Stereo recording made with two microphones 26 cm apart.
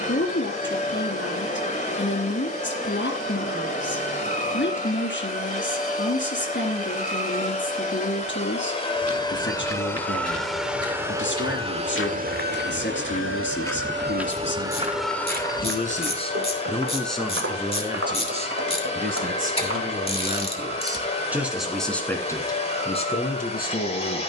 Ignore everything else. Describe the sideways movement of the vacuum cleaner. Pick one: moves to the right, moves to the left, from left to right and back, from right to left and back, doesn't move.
from left to right and back.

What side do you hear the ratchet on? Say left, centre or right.
left.